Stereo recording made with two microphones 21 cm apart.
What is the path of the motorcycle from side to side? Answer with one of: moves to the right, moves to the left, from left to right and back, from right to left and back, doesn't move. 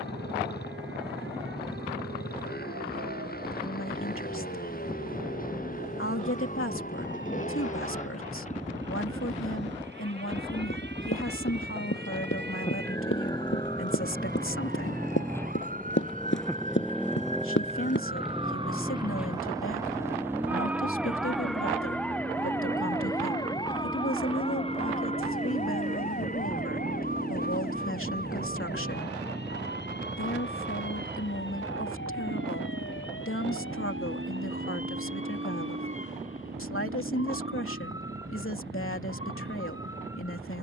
moves to the right.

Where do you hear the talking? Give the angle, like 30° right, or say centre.
80° left.